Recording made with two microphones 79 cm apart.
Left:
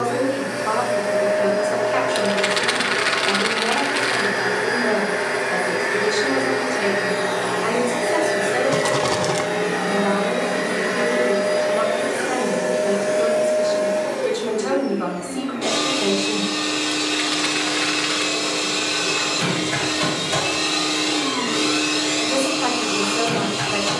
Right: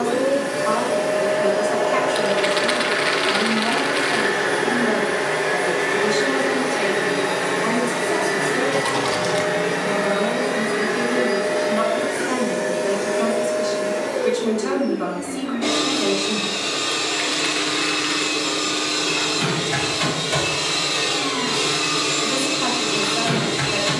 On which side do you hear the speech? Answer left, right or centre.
right.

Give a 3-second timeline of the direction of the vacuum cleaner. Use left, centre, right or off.
right, right, right, centre, left, left, centre, right.